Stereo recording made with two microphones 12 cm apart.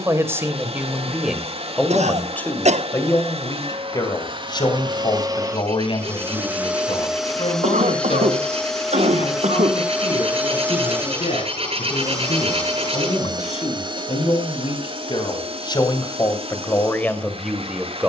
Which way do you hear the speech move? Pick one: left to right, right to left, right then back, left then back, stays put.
left then back.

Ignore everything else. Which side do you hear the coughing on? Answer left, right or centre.
right.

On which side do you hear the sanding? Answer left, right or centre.
right.